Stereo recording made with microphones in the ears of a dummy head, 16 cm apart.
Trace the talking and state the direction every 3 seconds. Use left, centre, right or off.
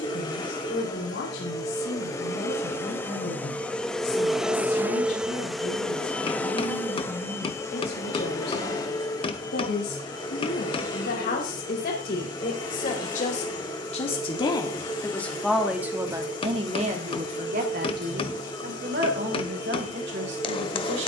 left, left, left, left, left, right, right.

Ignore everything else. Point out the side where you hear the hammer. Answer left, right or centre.
left.